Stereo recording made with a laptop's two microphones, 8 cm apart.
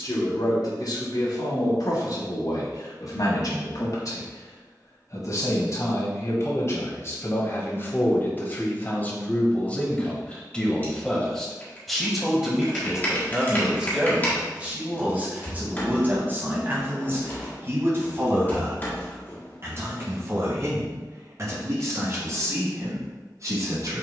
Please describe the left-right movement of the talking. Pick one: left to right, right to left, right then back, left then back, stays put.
left to right.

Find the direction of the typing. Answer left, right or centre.
left.